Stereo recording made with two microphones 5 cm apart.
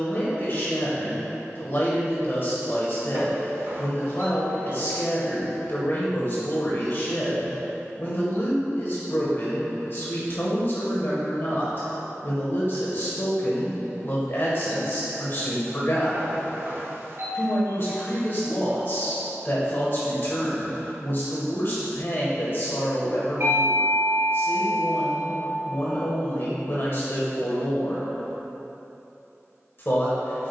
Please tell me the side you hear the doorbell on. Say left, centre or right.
right.